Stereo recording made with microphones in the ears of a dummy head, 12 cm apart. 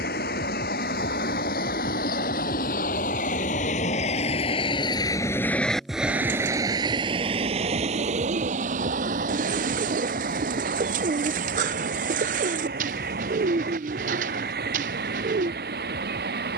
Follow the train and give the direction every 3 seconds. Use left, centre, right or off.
left, left, right, right, right, right.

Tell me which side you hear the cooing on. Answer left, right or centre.
right.